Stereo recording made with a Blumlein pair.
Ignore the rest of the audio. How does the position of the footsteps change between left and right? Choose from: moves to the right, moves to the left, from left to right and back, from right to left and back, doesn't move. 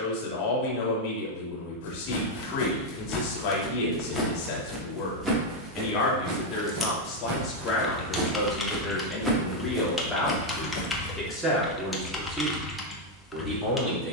from left to right and back.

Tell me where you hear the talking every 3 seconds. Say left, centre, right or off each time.
left, left, left, centre, centre.